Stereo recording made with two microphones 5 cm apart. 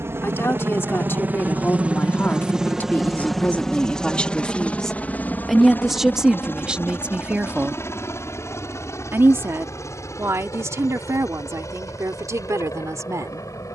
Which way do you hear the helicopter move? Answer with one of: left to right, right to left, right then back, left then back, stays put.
right to left.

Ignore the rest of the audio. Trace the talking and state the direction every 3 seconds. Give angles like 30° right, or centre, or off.
40° left, 20° left, 20° right, 60° right, 70° right.